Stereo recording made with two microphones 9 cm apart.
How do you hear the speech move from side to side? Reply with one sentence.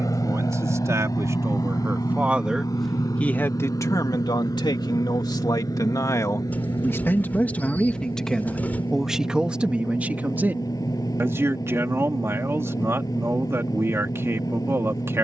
In this clip you hear the speech move from right to left and back again.